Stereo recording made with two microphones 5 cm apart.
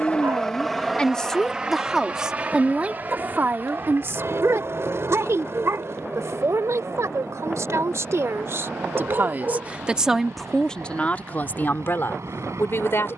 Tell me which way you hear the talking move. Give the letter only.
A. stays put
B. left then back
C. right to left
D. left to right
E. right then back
E.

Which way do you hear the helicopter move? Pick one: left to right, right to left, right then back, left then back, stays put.
left to right.